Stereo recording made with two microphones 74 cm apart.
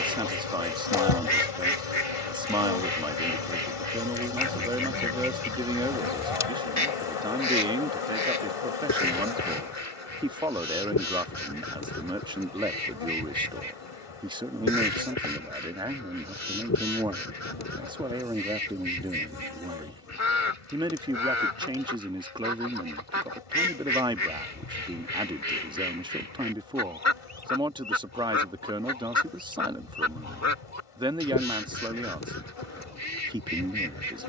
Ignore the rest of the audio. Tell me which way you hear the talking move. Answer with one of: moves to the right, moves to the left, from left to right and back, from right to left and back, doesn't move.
doesn't move.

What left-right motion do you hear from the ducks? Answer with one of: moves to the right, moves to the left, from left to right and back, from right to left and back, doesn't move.
doesn't move.